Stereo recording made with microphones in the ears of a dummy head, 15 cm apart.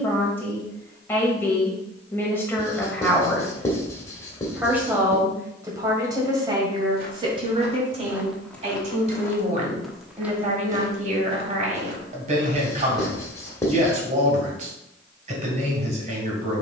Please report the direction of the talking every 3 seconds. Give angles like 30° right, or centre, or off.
10° left, 10° right, 30° right, 40° right, 40° right, 40° right.